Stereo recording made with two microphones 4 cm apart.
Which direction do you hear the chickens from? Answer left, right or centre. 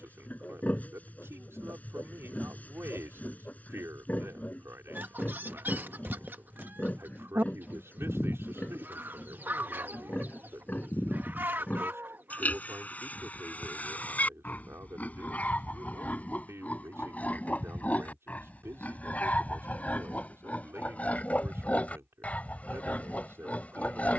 right.